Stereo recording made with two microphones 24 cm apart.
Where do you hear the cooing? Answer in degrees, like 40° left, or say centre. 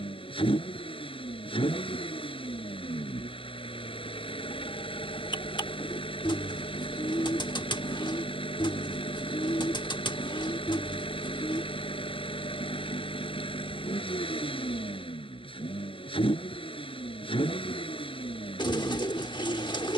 20° left.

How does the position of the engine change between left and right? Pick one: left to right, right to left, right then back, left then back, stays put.
stays put.